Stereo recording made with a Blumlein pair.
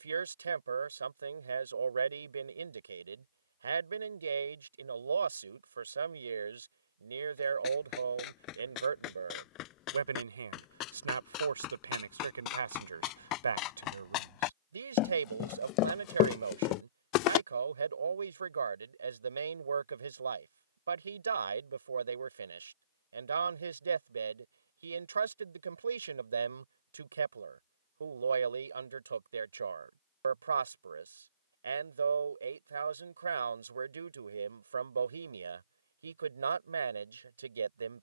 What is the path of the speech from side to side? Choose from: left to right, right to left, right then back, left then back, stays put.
stays put.